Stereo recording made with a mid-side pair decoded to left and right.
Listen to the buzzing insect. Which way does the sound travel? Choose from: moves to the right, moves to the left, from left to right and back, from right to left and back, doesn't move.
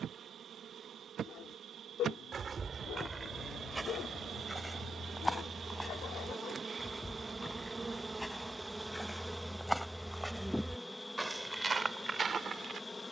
moves to the left.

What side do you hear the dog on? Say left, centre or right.
left.